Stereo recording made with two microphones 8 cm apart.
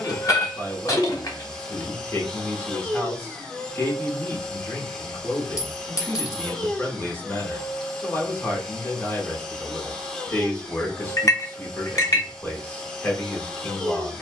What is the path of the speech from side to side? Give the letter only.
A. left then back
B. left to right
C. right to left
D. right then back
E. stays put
E.